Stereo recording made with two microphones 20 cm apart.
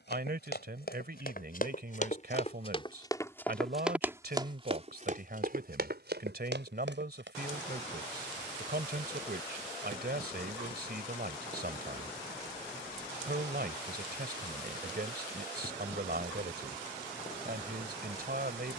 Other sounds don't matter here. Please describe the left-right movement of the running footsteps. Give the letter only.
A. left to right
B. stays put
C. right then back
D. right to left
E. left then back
A.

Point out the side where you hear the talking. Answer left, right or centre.
right.